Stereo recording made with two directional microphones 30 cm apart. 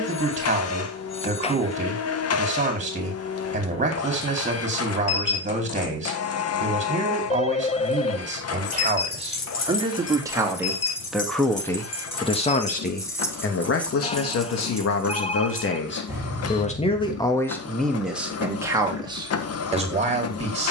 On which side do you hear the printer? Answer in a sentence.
In this clip you hear the printer on the left.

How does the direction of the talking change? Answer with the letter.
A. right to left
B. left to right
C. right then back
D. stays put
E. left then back
E.